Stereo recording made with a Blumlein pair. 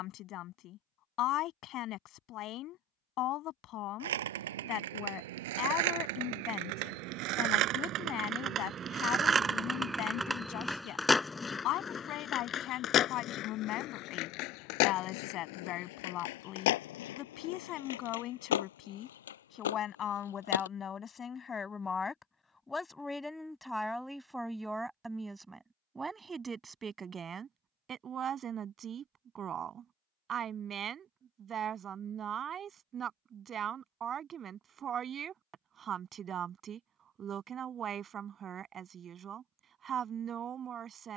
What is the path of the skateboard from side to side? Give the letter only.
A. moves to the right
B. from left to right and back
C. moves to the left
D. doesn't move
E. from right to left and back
C.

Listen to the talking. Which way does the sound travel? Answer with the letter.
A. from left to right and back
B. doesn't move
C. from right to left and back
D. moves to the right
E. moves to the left
D.